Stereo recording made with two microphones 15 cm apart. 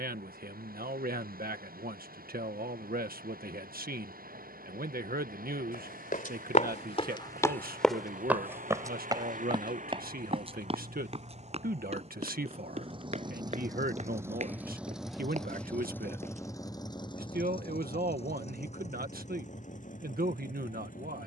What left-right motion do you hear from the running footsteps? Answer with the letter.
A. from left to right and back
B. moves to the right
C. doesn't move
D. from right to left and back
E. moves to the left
B.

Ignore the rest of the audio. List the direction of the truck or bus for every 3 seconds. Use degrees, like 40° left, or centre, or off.
70° right, 70° right, 70° right, 50° right, 30° right, 20° left, 50° left.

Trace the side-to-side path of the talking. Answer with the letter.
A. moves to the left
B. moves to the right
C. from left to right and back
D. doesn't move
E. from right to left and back
D.